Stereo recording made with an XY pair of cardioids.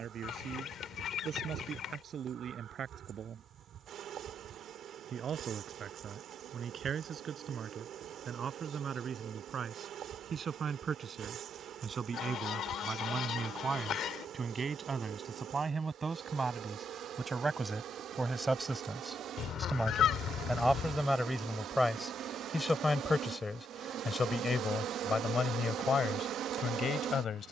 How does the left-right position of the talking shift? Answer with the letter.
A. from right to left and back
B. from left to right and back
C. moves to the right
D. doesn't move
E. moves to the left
E.